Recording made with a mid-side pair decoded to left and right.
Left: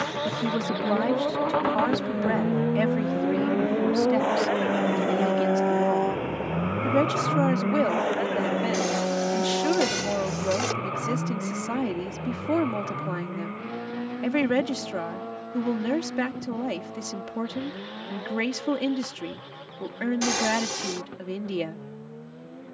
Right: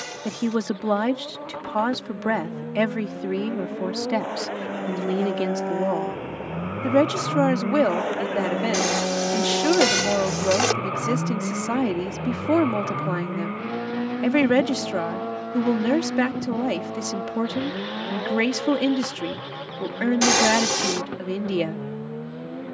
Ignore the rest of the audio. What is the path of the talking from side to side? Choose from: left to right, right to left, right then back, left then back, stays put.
stays put.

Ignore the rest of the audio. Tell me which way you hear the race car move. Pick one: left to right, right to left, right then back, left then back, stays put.
left to right.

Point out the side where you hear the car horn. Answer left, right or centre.
right.